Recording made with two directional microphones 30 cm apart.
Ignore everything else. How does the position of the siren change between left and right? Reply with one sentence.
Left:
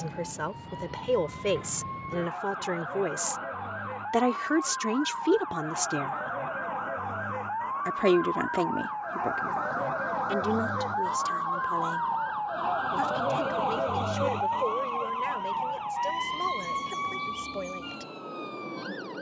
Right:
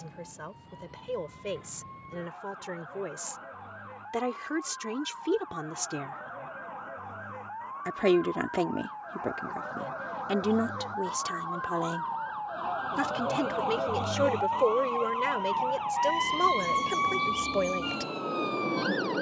You can hear the siren move from left to right.